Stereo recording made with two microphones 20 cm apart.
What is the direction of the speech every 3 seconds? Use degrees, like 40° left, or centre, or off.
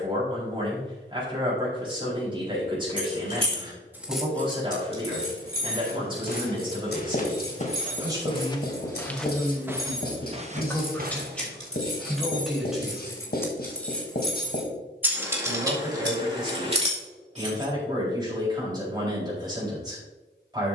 30° right, 30° right, 20° right, centre, centre, 20° right, 20° right.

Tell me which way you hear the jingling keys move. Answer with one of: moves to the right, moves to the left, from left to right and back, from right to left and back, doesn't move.
from right to left and back.